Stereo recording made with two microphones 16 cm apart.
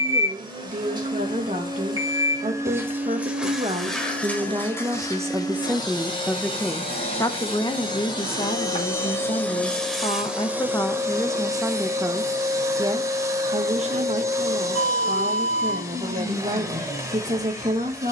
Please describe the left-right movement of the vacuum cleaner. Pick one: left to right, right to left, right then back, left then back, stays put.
left then back.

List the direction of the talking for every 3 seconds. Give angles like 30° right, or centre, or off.
50° right, 30° right, 30° left, 20° left, 40° right, 50° right.